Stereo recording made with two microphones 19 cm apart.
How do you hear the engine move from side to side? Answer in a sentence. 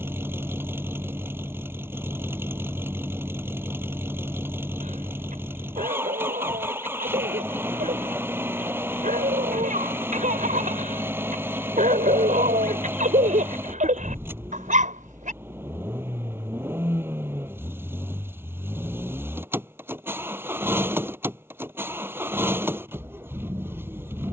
In this clip you hear the engine stay in one place.